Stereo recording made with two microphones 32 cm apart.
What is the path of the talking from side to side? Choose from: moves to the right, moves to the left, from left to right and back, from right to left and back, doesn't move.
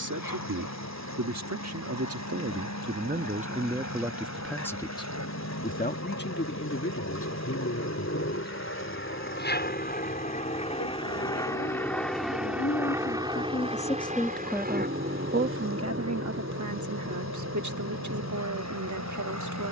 from right to left and back.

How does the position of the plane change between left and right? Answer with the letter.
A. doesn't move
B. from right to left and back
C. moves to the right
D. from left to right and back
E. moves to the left
C.